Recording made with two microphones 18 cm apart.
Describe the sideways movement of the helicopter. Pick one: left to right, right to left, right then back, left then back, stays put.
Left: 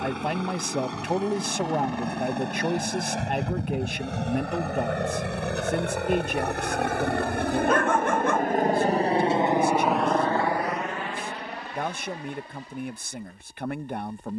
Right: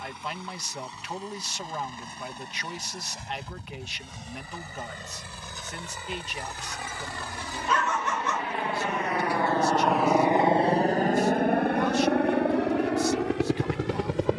left to right.